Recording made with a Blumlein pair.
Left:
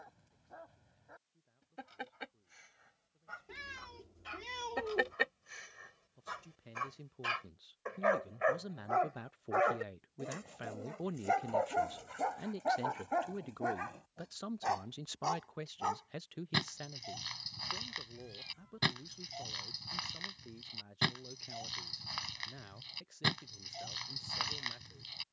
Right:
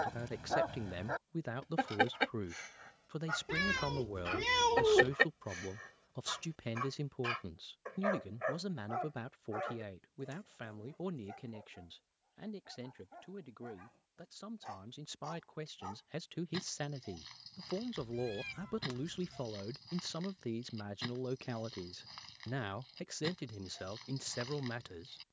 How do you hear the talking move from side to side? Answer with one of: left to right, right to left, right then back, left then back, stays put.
left then back.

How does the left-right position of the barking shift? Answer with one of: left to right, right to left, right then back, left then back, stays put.
right to left.